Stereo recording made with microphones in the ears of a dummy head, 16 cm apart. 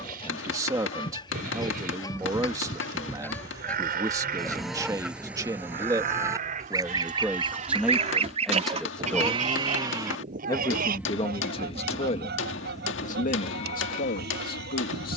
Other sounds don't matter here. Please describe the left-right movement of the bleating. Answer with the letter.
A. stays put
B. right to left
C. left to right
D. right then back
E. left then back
B.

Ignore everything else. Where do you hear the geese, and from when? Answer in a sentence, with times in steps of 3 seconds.
In this clip you hear the geese on the left from 0 s, in the centre from 3 s and on the right from 6 s.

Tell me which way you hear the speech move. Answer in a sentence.
You can hear the speech go from the right side to the left.